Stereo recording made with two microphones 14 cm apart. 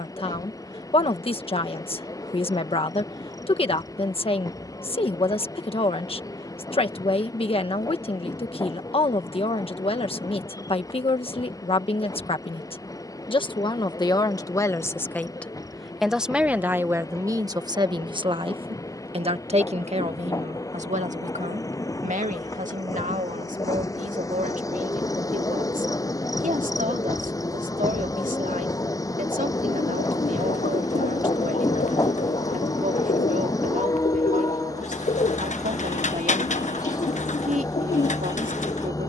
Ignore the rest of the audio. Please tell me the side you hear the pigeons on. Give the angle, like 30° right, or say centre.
60° left.